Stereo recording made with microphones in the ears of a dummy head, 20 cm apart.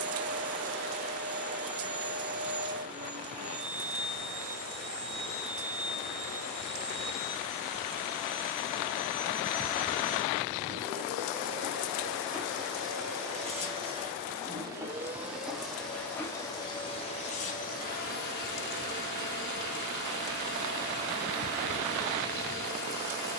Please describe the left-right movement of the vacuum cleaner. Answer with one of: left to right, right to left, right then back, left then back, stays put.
right to left.